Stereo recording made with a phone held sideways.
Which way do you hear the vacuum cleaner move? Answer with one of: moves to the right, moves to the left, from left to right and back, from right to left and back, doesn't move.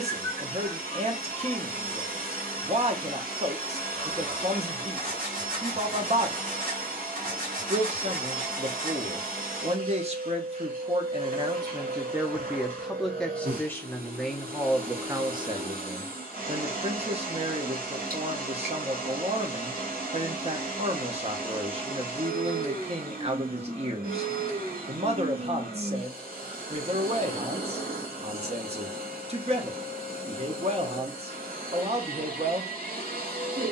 doesn't move.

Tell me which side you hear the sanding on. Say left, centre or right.
right.